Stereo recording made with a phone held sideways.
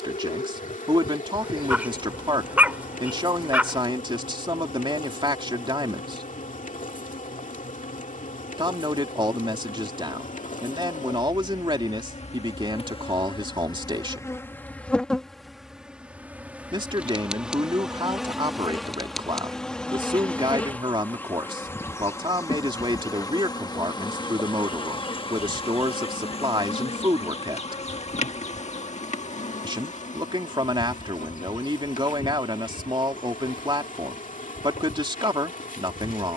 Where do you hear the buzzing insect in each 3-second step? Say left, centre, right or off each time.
left, left, left, left, left, centre, centre, left, left, left, left, left.